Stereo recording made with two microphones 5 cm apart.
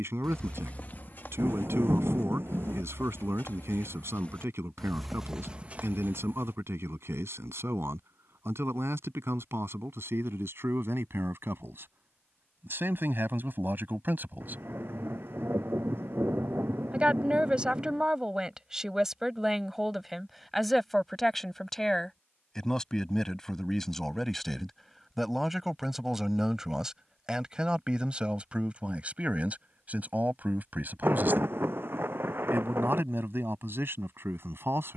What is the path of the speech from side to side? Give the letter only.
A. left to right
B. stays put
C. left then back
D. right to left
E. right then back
C.